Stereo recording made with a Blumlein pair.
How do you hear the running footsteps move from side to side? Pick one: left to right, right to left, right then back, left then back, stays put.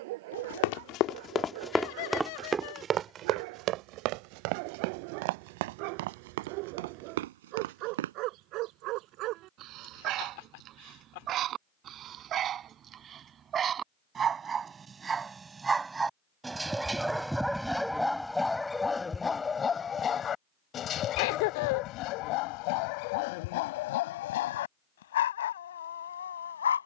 left to right.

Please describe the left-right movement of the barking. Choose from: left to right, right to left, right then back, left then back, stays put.
right to left.